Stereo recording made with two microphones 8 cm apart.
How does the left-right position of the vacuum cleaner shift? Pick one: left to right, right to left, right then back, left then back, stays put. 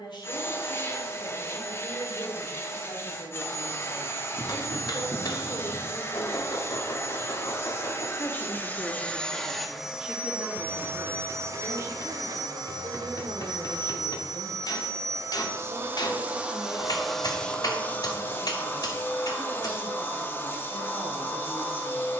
right then back.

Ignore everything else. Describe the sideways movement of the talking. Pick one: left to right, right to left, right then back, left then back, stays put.
left to right.